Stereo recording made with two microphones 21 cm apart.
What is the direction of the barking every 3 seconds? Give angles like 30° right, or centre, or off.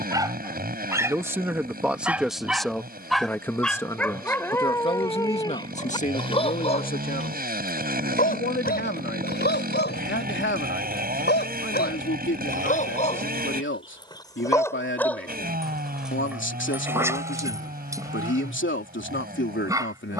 10° right, 10° left, 40° left, 50° left, 30° left, 10° right, 20° right.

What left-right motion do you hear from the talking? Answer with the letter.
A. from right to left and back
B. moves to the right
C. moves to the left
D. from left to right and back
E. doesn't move
C.